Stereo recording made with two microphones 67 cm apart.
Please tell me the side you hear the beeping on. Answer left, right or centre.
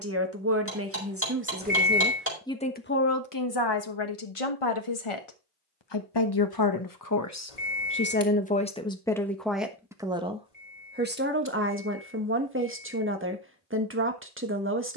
left.